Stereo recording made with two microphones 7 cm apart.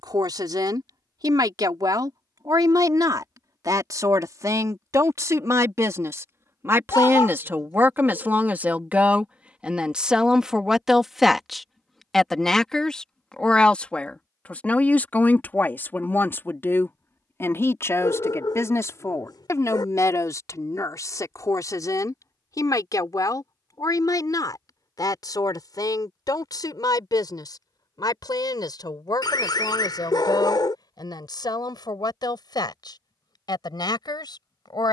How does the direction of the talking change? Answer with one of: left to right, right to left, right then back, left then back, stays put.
right to left.